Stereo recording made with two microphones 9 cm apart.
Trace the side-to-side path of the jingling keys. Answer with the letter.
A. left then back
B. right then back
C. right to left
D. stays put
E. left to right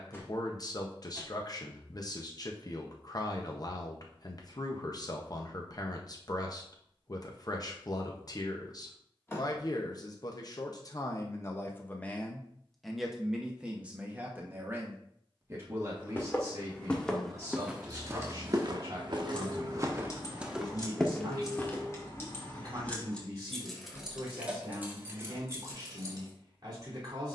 A.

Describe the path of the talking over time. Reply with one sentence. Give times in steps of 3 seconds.
You can hear the talking on the left from 0 s, in the centre from 12 s and on the right from 15 s.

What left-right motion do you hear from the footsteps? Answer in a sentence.
In this clip you hear the footsteps move from left to right and back again.